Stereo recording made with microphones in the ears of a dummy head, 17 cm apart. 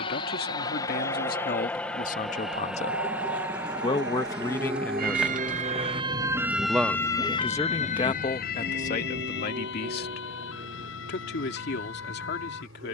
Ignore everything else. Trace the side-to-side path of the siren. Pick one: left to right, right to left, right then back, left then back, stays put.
right to left.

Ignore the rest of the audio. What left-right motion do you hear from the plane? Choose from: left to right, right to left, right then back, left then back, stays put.
left to right.